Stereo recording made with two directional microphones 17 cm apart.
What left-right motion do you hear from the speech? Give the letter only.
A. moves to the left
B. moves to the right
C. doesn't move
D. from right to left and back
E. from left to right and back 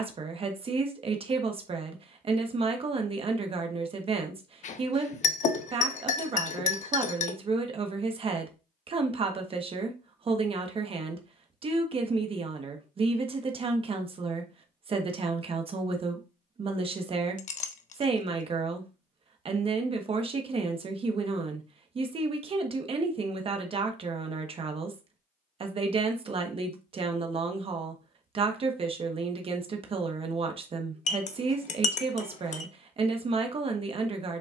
C.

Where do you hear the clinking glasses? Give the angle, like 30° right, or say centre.
50° left.